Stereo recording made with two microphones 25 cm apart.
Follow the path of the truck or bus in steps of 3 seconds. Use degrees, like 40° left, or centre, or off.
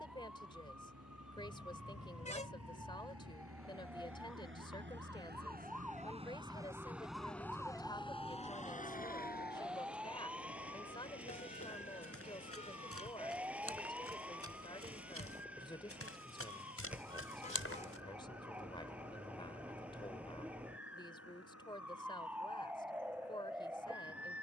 80° right, 50° right, 10° left, 50° left, 60° left, 70° left, 70° left, 70° left.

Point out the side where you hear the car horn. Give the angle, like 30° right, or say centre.
30° left.